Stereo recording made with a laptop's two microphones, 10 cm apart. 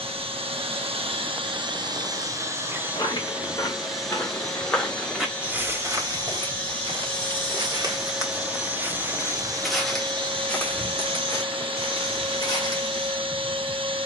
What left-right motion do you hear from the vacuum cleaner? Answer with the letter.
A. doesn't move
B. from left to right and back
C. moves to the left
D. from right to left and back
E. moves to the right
D.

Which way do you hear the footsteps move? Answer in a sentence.
You can hear the footsteps go right and come back.